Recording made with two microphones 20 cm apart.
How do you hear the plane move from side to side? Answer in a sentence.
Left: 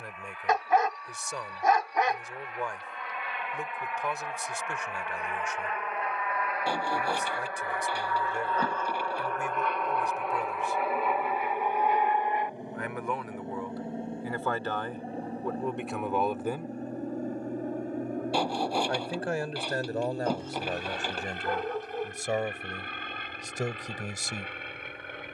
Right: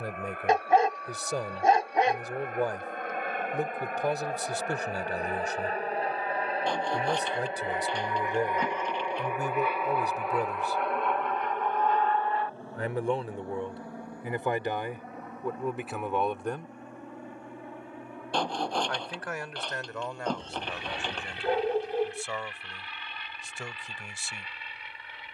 In this clip you hear the plane go from the right side to the left.